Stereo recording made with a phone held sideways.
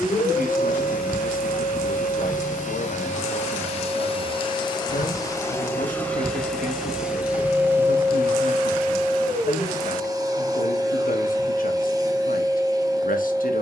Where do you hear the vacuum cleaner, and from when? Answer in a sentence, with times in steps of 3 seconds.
In this clip you hear the vacuum cleaner on the left from 0 s, in the centre from 6 s and on the right from 9 s.